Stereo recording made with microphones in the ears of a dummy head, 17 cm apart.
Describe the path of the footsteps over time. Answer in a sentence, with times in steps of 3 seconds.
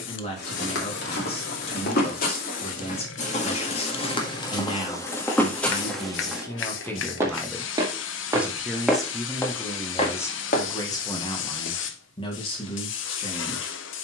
You can hear the footsteps on the left from 0 s, in the centre from 6 s, on the left from 9 s and not at all from 12 s.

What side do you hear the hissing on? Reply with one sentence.
You can hear the hissing on the left.